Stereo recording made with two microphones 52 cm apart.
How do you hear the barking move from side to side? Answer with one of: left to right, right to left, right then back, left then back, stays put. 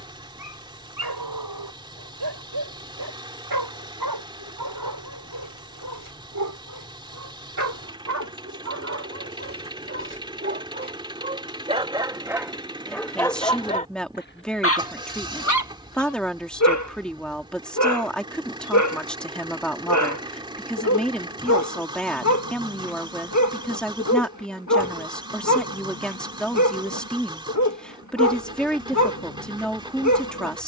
right to left.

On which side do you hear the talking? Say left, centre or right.
centre.